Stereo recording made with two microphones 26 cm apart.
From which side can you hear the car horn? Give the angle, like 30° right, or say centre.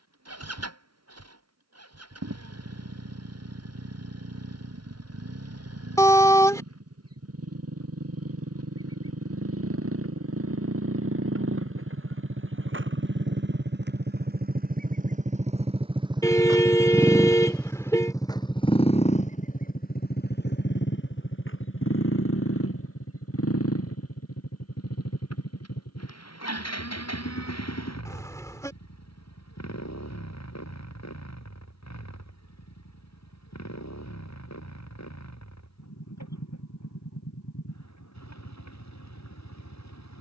10° left.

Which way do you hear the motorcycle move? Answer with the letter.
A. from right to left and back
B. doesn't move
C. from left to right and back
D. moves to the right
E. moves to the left
E.